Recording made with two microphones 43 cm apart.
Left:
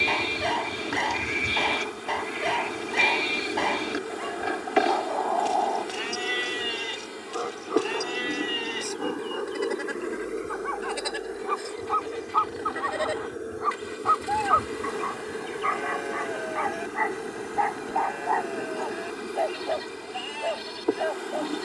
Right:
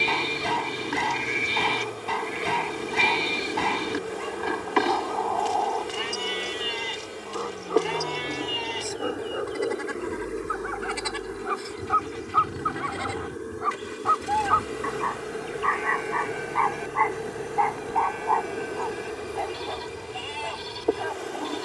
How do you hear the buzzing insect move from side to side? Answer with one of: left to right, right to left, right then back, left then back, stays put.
right then back.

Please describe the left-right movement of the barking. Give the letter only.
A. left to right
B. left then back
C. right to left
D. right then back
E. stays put
B.